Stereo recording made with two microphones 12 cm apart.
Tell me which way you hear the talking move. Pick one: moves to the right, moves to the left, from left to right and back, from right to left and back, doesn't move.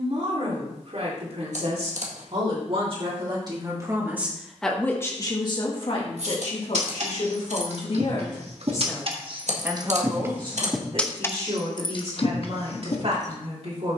from right to left and back.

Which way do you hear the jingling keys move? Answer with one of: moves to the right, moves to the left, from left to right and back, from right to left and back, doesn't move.
moves to the left.